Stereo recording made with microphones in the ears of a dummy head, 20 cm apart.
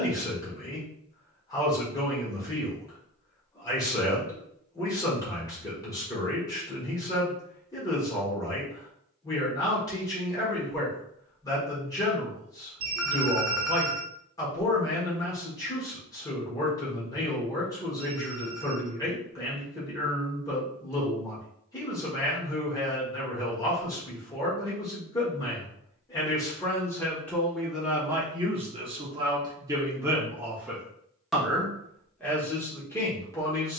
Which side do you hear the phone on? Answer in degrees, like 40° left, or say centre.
60° right.